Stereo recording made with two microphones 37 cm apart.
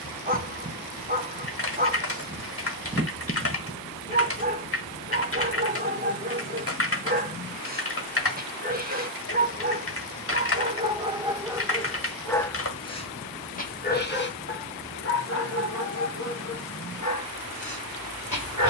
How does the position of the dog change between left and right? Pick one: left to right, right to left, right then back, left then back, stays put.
right to left.